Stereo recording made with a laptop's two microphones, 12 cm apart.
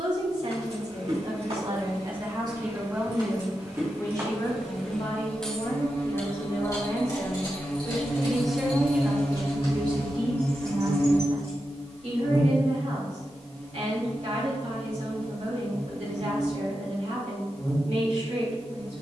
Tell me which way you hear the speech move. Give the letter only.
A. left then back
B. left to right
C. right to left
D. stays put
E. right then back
A.